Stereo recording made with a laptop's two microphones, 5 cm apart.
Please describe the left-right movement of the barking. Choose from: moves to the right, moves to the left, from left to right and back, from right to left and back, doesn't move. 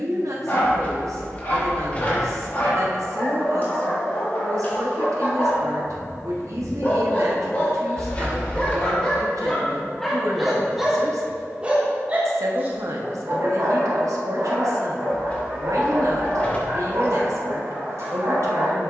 moves to the right.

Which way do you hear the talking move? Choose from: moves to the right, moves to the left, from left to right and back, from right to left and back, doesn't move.
doesn't move.